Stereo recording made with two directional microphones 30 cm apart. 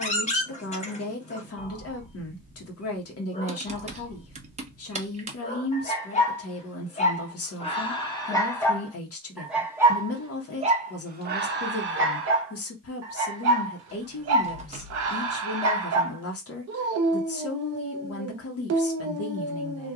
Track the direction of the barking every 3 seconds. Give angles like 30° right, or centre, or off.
20° left, 20° left, 20° left, 20° right, 50° right, 60° right, 60° right.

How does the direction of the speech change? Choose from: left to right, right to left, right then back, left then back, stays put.
stays put.